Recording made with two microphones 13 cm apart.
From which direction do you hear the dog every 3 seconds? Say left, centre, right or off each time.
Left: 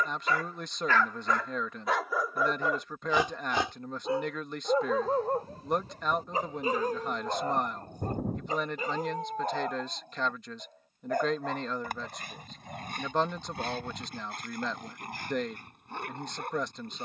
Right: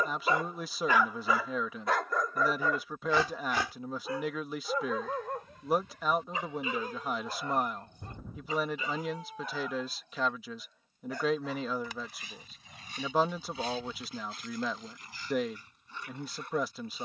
centre, left, left, left, left, left.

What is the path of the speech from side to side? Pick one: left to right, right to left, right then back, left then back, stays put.
stays put.